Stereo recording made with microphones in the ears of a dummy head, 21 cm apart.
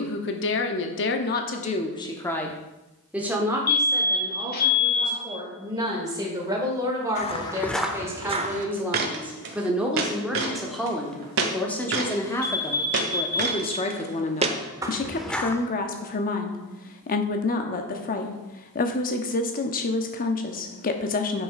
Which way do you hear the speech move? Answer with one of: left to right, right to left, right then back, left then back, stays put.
right then back.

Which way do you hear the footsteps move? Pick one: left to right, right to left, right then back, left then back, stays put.
right then back.